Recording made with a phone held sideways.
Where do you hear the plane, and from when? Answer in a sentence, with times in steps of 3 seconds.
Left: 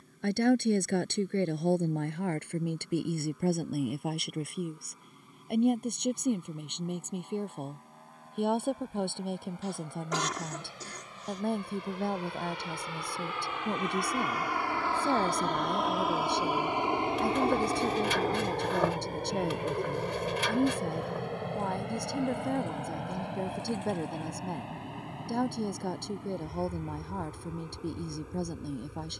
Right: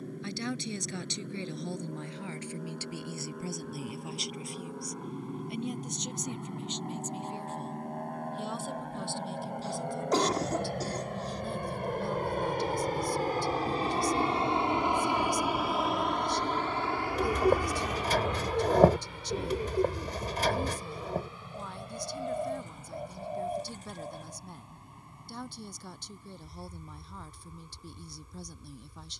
You can hear the plane on the right from 0 s, in the centre from 15 s and on the left from 18 s.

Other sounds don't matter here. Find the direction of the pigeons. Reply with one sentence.
You can hear the pigeons on the right.